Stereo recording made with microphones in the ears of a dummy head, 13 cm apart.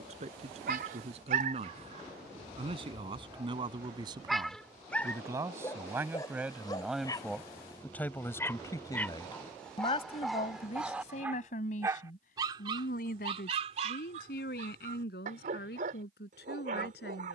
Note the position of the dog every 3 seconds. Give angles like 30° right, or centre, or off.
60° right, centre, 20° left, centre, 40° right, 60° right.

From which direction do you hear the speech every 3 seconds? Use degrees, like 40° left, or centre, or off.
50° right, 30° right, centre, 50° left, 70° left, 80° left.